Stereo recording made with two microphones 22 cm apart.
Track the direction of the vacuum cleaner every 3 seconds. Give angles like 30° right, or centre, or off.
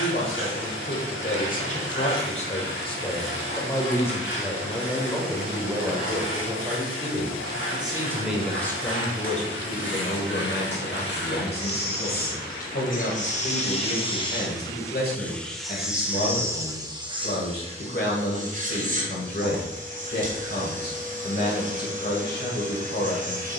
60° left, 60° left, 60° left, 60° left, 30° left, 10° right, 40° right, 40° right.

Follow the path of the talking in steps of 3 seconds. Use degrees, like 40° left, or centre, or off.
40° left, centre, 10° right, 40° left, 50° left, 50° left, 50° left, 50° left.